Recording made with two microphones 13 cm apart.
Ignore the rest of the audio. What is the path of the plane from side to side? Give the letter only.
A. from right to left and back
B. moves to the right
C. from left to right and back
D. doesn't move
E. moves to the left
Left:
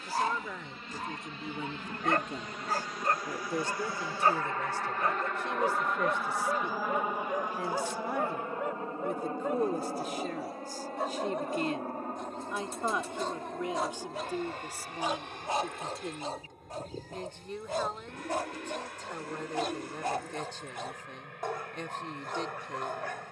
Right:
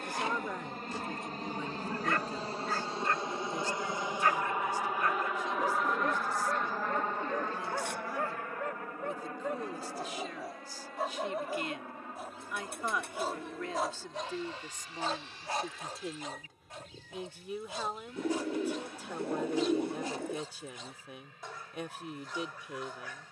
E.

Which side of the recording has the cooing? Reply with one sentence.
In this clip you hear the cooing on the right.